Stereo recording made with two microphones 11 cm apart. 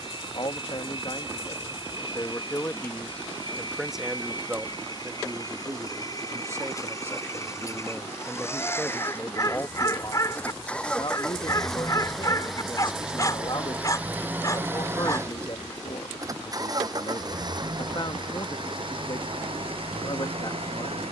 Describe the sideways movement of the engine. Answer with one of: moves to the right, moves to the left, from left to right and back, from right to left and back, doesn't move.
moves to the right.